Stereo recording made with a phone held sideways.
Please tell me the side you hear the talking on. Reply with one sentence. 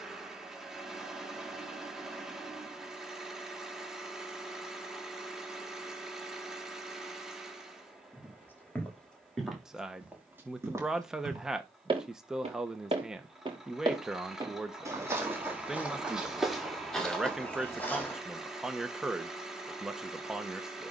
You can hear the talking in the centre.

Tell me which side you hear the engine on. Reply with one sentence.
You can hear the engine in the centre.